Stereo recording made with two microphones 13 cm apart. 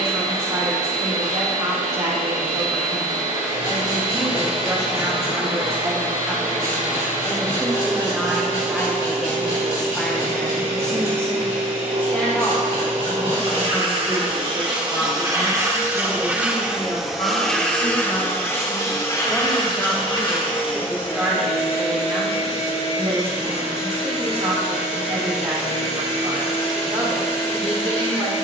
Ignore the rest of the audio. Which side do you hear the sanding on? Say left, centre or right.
left.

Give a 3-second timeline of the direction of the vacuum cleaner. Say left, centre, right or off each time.
right, right, right, right, right, centre, left, left, left, left.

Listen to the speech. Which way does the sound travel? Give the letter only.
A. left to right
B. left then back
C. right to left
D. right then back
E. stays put
B.